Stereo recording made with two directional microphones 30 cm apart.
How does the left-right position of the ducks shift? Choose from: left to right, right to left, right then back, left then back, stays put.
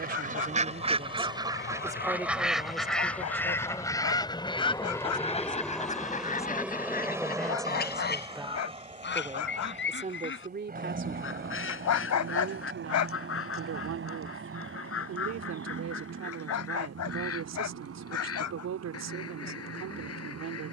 right to left.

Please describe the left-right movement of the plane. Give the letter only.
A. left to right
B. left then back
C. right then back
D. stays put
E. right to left
A.